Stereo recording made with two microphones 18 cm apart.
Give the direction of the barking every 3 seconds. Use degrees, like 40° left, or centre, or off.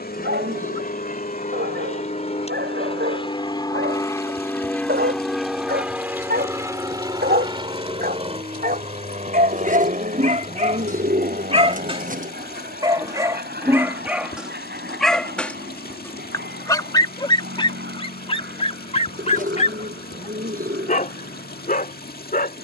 70° right, 70° right, 60° right, 40° right, 10° right, 20° left, 40° left, 50° left.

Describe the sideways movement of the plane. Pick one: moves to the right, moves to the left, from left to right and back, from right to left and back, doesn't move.
moves to the right.